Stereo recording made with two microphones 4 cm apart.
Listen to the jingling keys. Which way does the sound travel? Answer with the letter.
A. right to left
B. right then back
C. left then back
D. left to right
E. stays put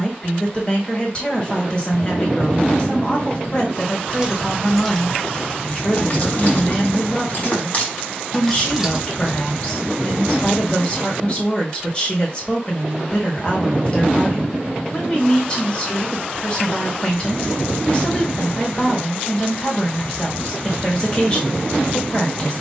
C.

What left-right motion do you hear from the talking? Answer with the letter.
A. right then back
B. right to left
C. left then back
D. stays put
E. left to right
D.